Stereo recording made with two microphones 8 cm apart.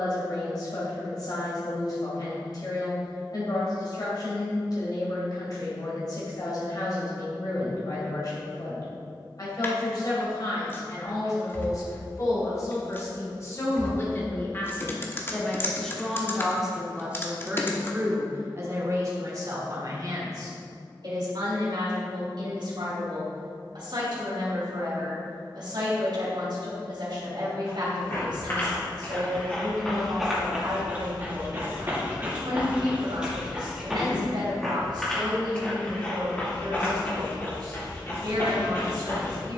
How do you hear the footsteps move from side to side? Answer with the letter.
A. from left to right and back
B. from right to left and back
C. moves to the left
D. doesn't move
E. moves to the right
A.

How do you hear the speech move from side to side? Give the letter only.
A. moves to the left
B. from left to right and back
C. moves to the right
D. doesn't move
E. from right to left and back
C.